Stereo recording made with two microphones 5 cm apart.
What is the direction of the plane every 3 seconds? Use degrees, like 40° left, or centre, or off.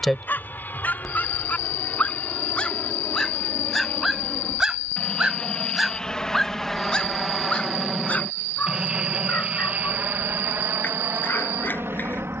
40° left, 30° left, centre, 40° right.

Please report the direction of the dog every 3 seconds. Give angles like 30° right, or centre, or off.
40° left, centre, 30° left, 50° left.